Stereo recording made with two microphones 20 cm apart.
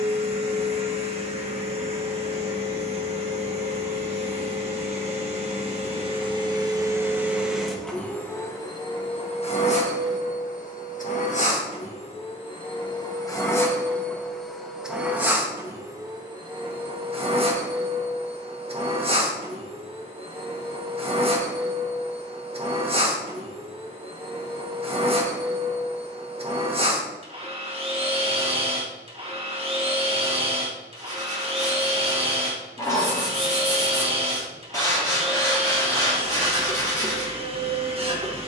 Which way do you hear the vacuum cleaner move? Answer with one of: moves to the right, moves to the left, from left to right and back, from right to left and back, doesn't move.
from right to left and back.